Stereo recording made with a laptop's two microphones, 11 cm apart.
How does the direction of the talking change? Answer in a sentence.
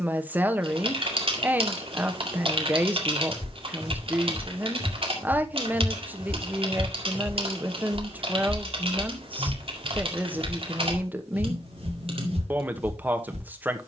In this clip you hear the talking stay in one place.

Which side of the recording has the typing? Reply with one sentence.
You can hear the typing on the right.